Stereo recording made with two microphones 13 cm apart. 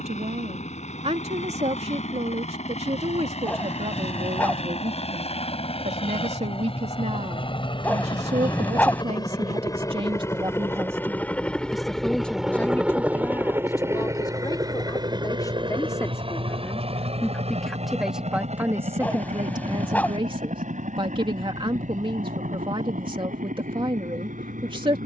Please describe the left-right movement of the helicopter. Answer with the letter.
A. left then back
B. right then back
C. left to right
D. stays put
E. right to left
C.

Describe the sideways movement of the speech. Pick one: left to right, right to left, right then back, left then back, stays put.
left then back.